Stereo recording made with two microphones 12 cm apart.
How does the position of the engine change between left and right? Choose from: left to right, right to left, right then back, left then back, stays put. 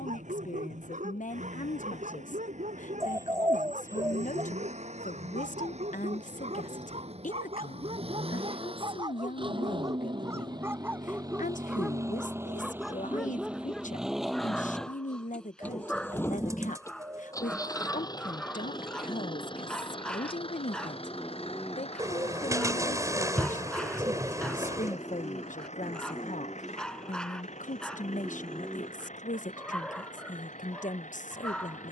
right to left.